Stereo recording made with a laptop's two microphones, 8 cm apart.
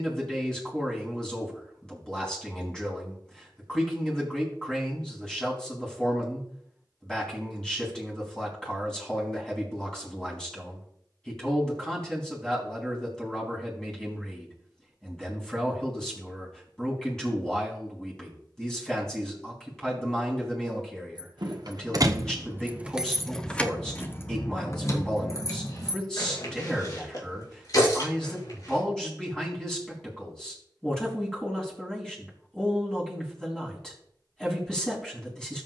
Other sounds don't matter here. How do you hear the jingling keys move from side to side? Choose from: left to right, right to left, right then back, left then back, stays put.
right to left.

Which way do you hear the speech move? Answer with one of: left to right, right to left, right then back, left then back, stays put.
stays put.